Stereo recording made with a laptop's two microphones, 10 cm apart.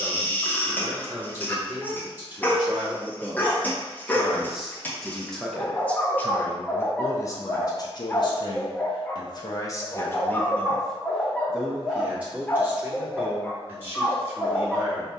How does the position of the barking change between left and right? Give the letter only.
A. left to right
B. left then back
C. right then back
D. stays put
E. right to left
D.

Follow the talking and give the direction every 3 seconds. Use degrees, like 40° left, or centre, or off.
20° right, centre, 30° left, 20° left, 20° right.